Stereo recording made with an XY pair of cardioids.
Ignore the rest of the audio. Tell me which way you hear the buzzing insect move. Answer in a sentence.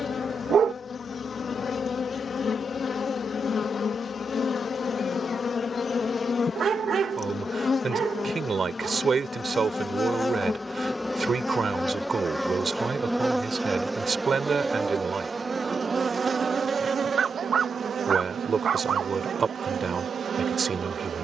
You can hear the buzzing insect move from left to right.